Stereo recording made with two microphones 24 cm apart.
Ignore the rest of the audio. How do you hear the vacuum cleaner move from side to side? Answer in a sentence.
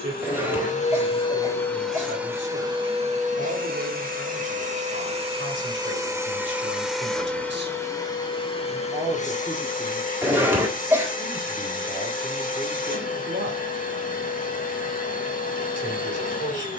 In this clip you hear the vacuum cleaner move from left to right and back again.